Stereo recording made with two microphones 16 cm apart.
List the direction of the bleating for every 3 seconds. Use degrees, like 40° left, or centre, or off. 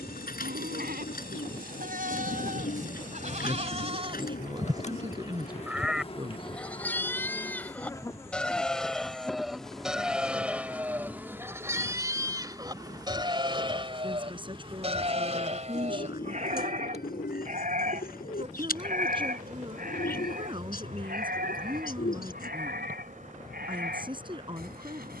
70° right, 30° right, 10° left, 10° right, 30° right, 50° right, 70° right, 70° right, 80° right.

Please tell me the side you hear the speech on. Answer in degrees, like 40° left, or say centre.
30° right.